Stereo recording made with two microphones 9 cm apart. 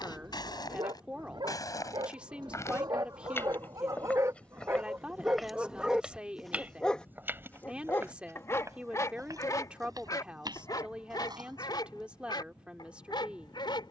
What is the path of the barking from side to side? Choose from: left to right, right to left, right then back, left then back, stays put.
right to left.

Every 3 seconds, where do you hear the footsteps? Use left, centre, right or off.
left, centre, right, right, off.